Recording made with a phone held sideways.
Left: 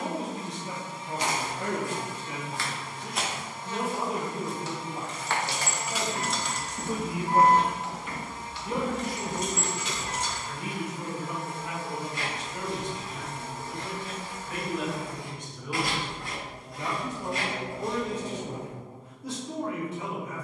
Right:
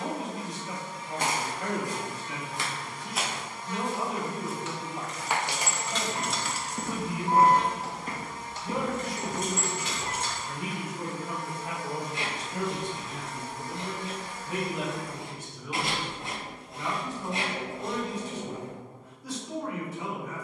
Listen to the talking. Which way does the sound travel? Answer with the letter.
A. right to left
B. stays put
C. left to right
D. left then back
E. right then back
E.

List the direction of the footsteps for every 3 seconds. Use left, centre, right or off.
right, centre, right, right, off, off, off.